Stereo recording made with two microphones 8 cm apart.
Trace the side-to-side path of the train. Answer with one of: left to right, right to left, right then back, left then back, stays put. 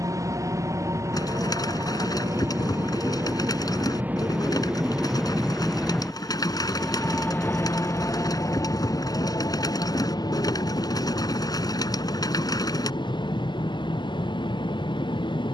right to left.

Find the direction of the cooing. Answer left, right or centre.
left.